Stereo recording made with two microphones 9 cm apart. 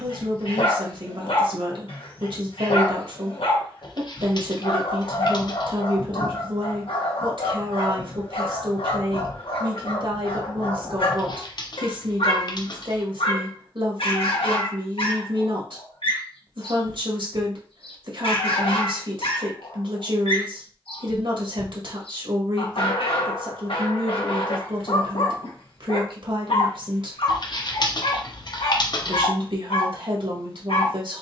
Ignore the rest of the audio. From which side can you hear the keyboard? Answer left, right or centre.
left.